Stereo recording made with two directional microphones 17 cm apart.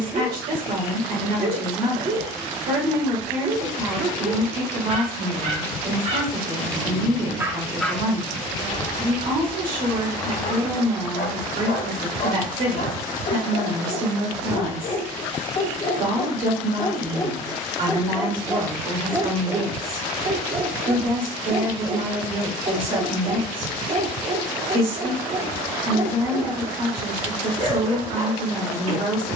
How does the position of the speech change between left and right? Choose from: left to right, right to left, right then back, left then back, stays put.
stays put.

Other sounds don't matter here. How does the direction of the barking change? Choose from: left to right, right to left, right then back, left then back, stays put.
left then back.